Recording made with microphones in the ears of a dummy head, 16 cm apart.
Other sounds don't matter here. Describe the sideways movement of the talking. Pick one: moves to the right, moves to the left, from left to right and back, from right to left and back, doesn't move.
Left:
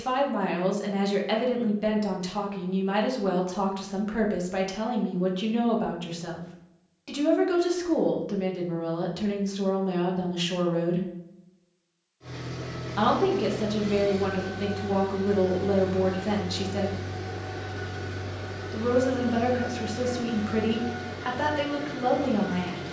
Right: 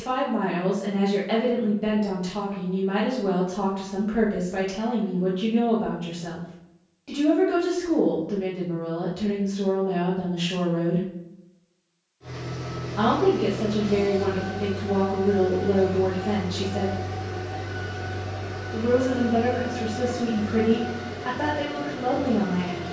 doesn't move.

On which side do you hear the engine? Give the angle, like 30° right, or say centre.
20° left.